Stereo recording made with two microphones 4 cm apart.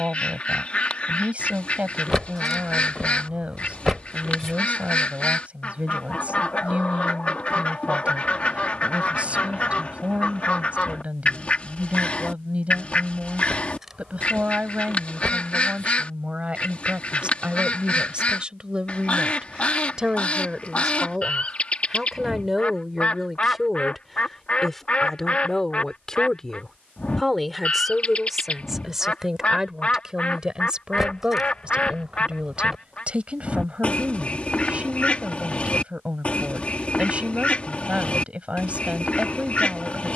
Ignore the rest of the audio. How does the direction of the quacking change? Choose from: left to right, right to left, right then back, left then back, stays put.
stays put.